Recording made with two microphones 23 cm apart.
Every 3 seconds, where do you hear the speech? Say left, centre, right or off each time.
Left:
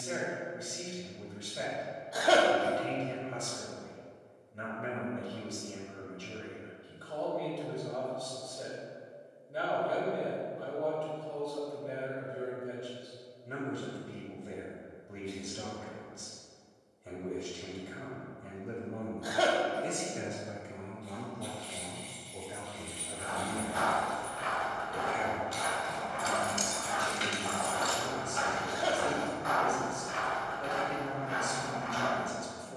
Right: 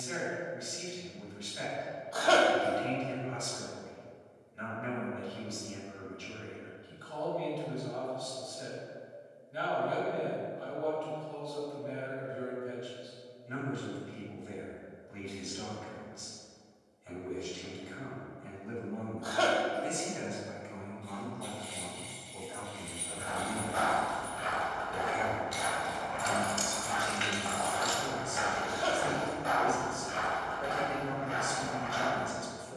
left, left, left, left, left, left, left, left, centre, centre, centre.